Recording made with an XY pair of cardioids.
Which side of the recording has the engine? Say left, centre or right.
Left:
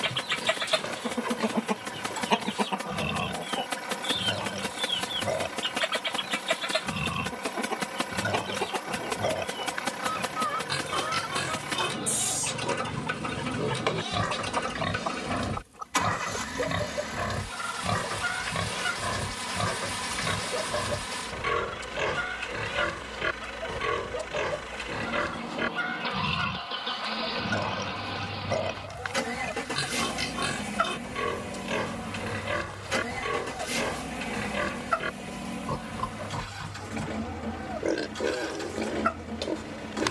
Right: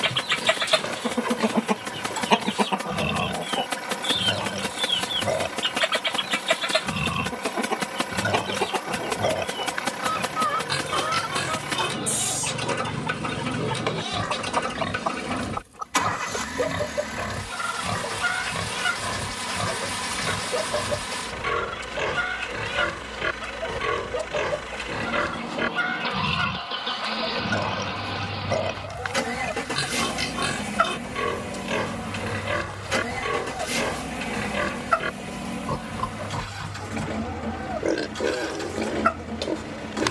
right.